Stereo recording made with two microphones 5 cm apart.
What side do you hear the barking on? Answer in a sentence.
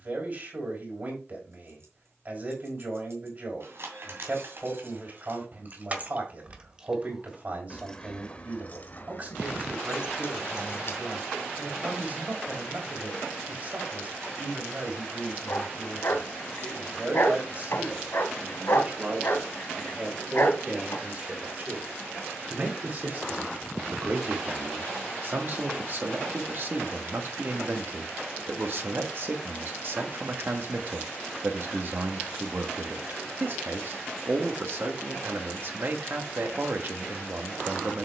In this clip you hear the barking on the left.